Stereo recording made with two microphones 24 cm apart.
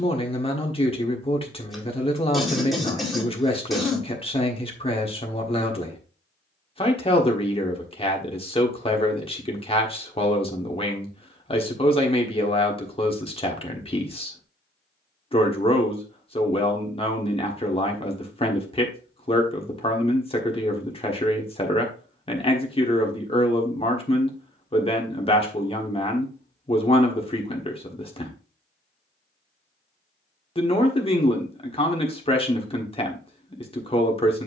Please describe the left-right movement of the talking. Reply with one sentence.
In this clip you hear the talking stay in one place.